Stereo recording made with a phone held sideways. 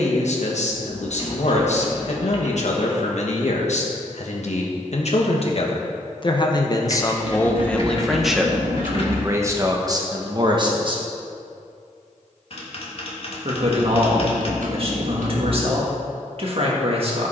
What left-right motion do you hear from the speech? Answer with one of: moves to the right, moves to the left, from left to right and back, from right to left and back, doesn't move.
moves to the right.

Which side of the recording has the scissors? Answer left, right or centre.
right.